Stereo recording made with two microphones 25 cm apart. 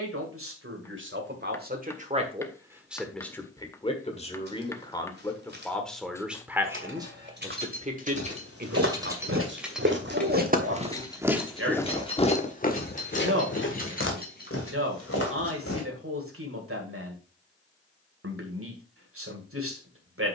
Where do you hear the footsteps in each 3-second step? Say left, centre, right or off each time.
off, off, right, right, left, left, off.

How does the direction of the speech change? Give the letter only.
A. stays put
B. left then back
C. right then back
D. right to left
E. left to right
B.